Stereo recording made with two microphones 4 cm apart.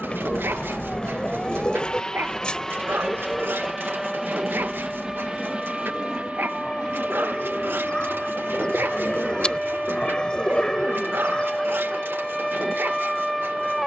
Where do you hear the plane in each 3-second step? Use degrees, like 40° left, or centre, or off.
30° left, 10° right, 30° right, 50° right, 50° right.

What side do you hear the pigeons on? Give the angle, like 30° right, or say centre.
20° left.